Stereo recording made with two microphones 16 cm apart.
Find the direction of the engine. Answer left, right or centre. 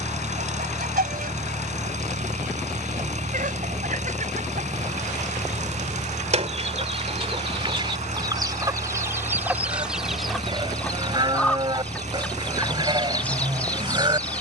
right.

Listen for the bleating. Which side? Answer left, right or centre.
right.